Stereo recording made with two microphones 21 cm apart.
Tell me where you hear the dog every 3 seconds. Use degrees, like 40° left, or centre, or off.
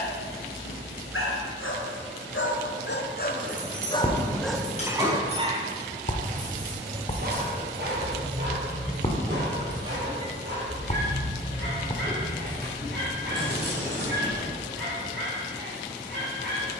70° left, centre, 50° right, 60° right, 60° right, 60° right.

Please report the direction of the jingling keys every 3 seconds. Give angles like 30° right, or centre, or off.
off, 40° left, 10° left, 30° right, 50° right, off.